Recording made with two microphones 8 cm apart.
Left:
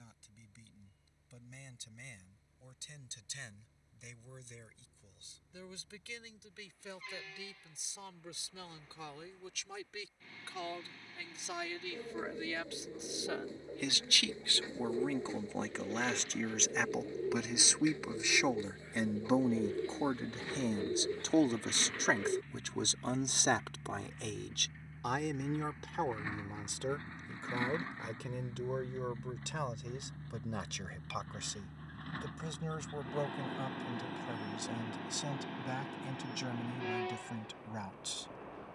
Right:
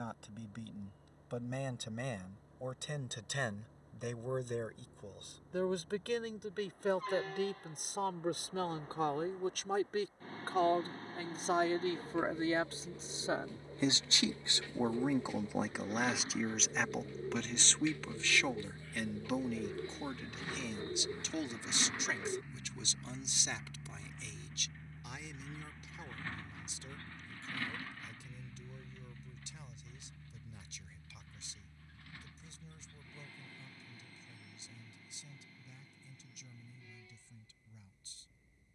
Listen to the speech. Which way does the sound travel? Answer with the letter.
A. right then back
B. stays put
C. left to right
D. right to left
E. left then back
D.